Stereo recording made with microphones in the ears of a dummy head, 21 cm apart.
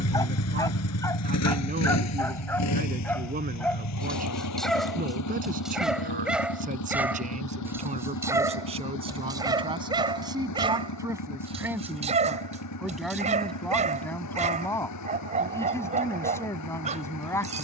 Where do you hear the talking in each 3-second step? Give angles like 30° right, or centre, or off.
40° right, 40° right, 30° right, 20° right, centre, 10° left.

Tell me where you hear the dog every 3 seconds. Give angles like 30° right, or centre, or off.
10° left, centre, 10° right, 20° right, 30° right, 30° right.